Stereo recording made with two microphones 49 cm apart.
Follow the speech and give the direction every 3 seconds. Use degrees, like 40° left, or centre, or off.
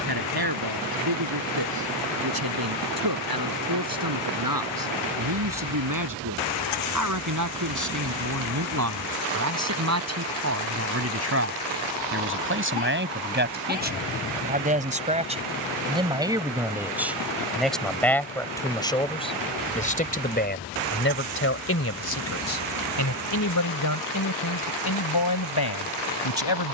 50° right, 40° right, 40° right, 30° right, 20° right, 10° right, 10° left, 30° left, 50° left.